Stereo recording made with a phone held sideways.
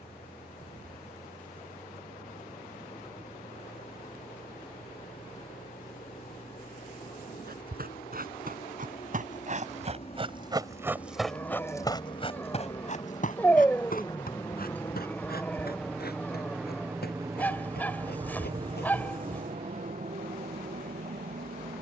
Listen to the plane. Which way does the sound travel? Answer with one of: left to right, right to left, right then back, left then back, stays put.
left to right.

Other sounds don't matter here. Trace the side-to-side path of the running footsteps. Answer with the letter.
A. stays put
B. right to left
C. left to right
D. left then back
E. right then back
B.